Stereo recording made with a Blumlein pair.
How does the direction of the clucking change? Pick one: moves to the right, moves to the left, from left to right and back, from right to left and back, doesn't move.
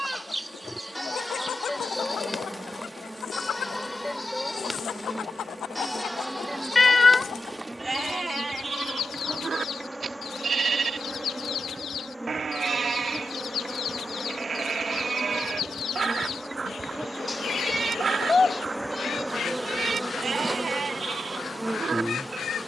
doesn't move.